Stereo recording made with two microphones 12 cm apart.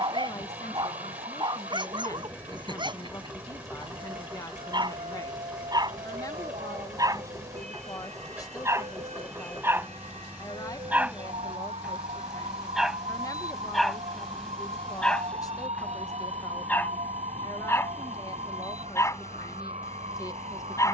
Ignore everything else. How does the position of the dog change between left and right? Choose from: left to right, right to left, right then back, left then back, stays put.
right to left.